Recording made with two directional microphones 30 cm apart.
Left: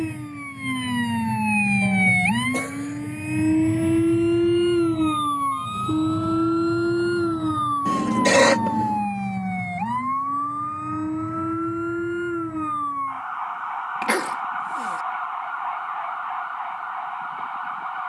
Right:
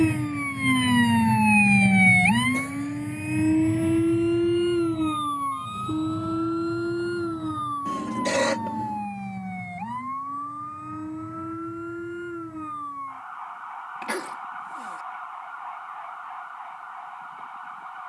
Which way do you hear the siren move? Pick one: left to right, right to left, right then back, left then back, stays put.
right to left.